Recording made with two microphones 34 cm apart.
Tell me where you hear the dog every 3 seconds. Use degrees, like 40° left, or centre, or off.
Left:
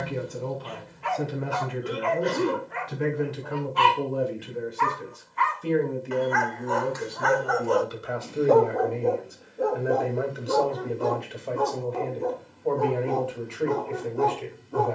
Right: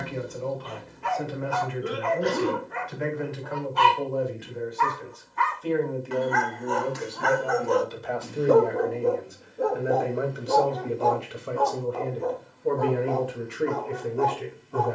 50° right, 50° right, 30° right, 10° left, 40° left.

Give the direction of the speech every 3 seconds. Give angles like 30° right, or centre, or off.
50° left, 40° left, 20° left, 10° right, 20° right.